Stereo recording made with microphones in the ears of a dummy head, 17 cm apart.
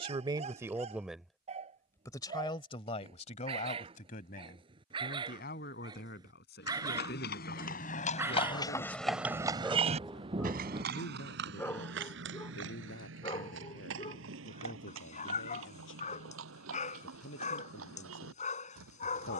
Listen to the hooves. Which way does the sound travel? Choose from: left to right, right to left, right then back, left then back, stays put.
left to right.